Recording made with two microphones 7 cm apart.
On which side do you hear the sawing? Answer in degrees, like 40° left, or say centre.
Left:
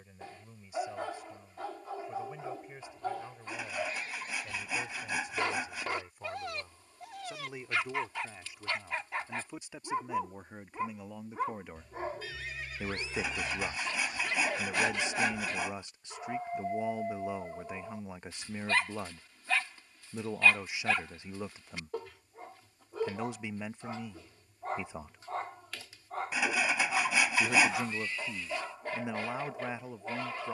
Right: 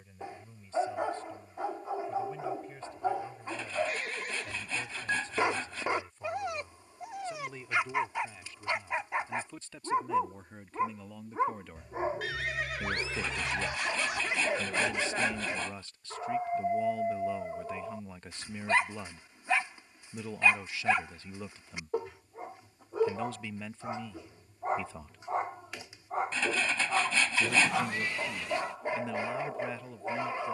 10° left.